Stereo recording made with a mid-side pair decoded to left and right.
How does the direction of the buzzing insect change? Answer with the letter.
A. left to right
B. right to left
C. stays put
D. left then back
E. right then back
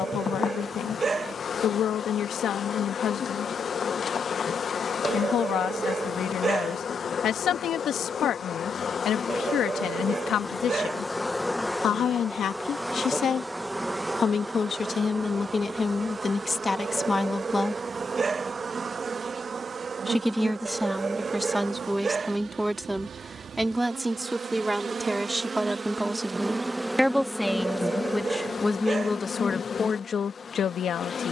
E.